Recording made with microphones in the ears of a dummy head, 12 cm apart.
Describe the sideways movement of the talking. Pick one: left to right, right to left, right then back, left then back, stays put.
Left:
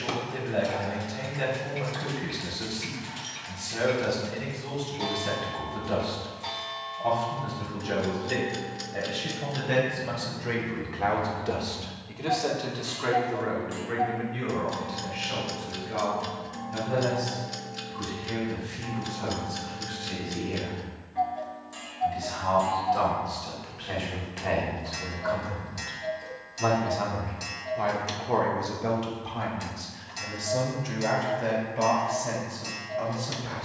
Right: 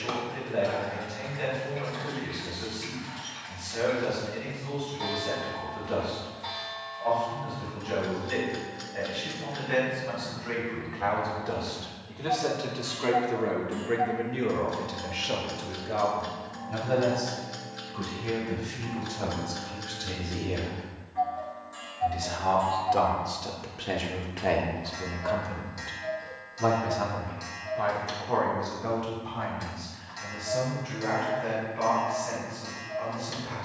right then back.